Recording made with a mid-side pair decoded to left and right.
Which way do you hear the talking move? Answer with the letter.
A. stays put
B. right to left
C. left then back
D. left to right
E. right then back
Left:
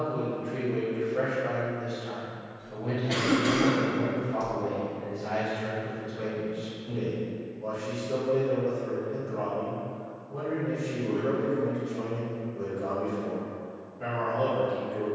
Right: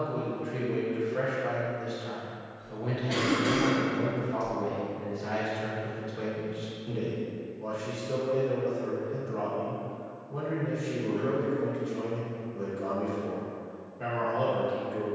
A.